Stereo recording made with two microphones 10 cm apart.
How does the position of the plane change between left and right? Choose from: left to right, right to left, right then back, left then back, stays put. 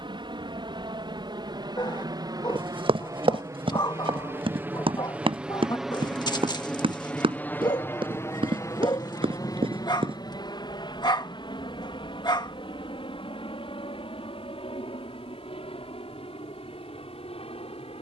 right to left.